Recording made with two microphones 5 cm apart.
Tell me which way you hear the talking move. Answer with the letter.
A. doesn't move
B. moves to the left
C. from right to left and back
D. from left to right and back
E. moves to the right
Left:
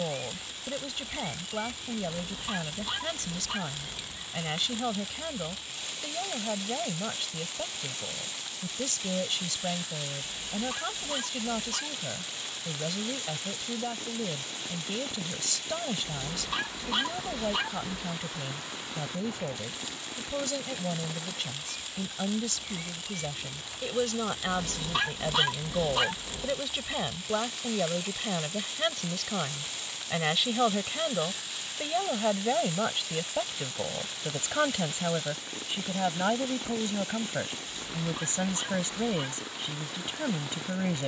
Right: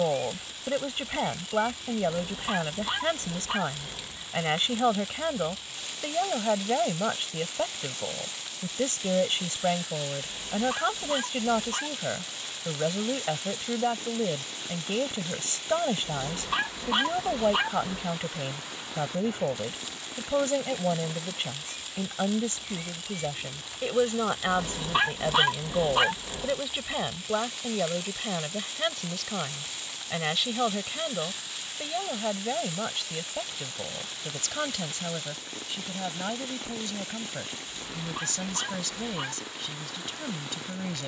B.